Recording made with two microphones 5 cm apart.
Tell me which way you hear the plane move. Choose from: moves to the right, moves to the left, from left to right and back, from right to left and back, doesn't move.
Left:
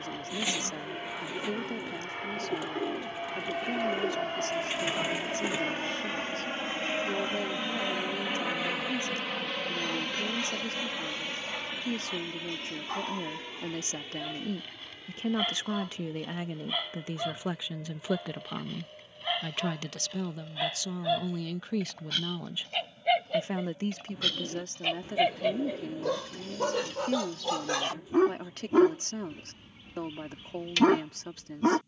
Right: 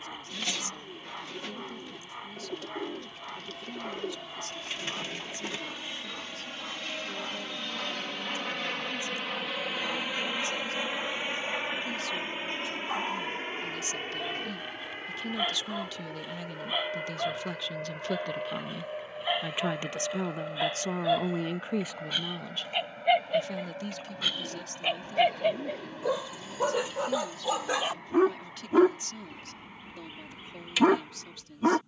moves to the right.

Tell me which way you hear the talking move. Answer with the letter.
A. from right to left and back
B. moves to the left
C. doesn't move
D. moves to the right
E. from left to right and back
E.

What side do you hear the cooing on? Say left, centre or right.
centre.